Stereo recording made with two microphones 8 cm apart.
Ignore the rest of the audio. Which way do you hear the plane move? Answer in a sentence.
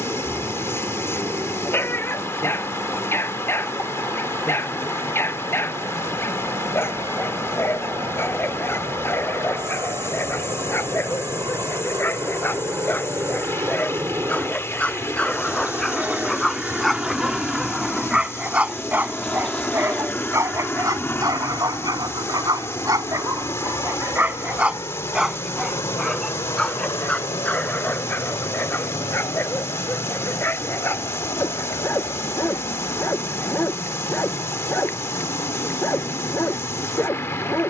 You can hear the plane move from right to left.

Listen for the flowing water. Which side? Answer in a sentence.
You can hear the flowing water on the left.